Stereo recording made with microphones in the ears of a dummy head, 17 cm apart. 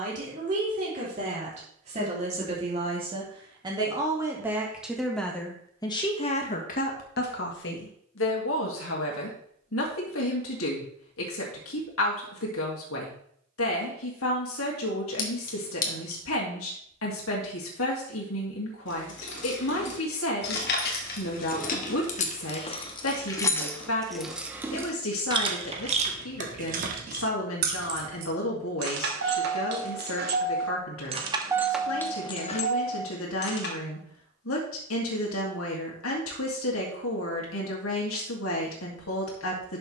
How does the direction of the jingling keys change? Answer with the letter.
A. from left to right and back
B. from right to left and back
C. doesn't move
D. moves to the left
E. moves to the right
A.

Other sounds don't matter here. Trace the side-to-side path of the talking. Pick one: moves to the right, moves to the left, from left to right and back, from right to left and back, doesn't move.
moves to the left.